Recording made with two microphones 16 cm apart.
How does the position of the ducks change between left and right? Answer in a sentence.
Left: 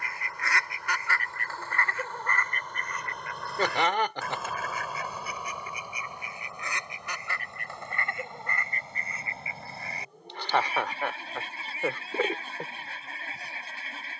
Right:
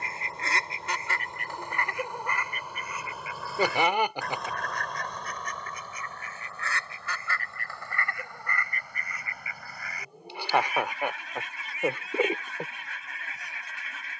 In this clip you hear the ducks move to the left.